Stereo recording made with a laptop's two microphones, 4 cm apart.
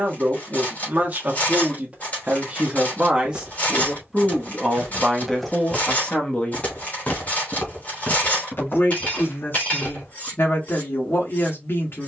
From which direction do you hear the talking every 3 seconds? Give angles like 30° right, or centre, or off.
30° right, centre, 40° left, 60° left.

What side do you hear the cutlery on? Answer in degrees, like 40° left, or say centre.
40° left.